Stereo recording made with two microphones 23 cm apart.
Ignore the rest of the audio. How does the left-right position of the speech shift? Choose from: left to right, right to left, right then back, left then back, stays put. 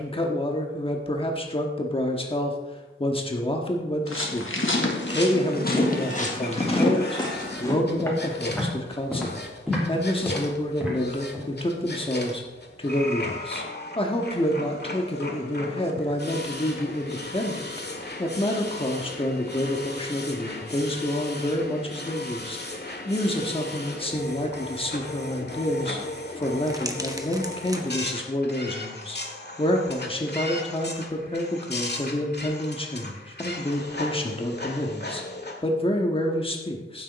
stays put.